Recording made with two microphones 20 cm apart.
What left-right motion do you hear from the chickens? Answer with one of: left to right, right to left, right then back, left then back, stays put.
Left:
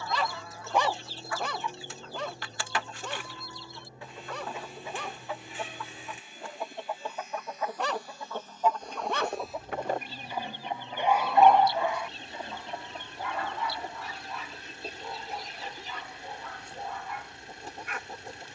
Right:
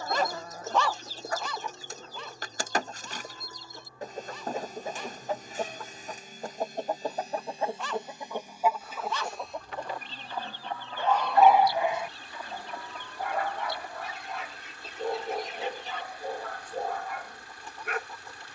right to left.